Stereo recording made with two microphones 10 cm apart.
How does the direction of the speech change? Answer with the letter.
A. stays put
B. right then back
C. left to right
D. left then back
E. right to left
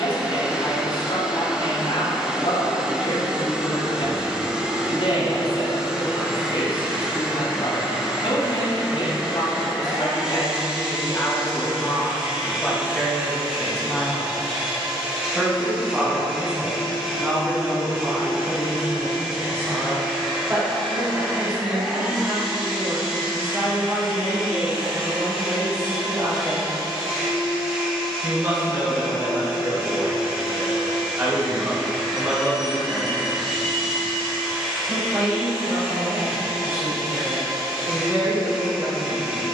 C.